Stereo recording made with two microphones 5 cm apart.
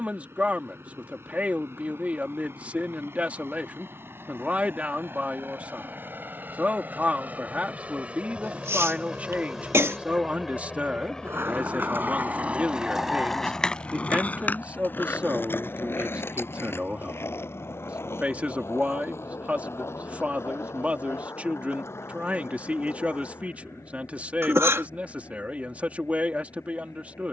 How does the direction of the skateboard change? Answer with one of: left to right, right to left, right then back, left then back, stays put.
right to left.